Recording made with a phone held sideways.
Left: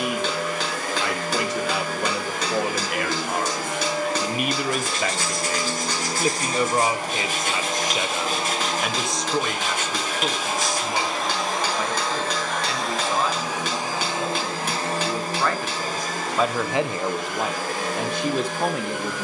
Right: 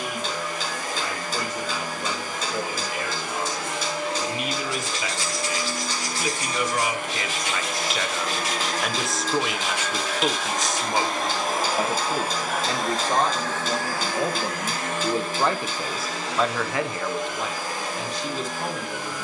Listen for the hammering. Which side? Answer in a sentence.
You can hear the hammering on the left.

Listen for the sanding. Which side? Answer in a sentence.
You can hear the sanding on the left.